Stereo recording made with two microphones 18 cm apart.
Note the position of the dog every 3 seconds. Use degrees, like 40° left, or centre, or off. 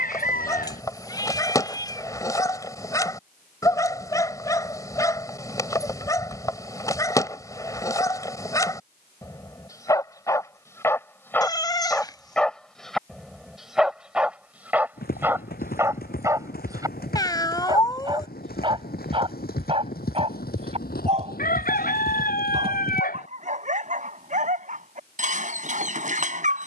20° left, 20° left, 20° left, 20° left, centre, 20° right, 30° right, 40° right, 50° right.